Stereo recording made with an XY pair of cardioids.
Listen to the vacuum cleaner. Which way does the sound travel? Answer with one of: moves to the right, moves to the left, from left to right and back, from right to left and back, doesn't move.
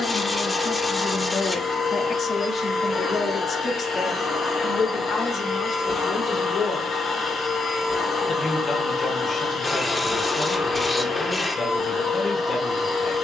doesn't move.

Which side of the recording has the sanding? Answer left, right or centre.
left.